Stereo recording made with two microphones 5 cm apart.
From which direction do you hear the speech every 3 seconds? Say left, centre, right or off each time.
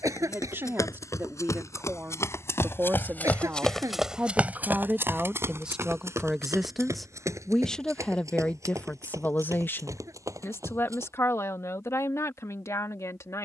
right, right, centre, left, left.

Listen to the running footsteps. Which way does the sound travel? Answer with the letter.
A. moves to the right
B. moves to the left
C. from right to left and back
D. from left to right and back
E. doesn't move
A.